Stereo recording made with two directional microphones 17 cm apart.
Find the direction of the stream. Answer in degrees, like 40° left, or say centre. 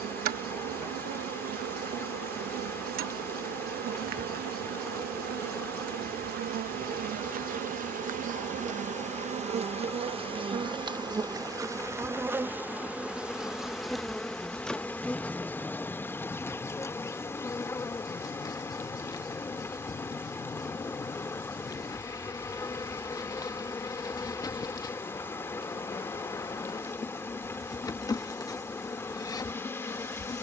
10° left.